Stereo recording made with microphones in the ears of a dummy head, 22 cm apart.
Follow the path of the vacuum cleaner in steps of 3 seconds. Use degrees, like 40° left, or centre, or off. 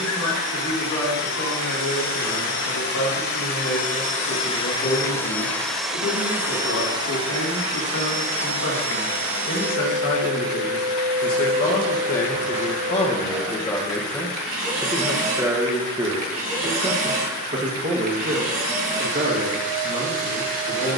60° left, 20° left, 20° right, 40° right, 40° right, 40° right, 40° right.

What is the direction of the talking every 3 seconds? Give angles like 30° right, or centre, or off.
80° left, 70° left, 70° left, 50° left, 20° left, 20° right, 50° right.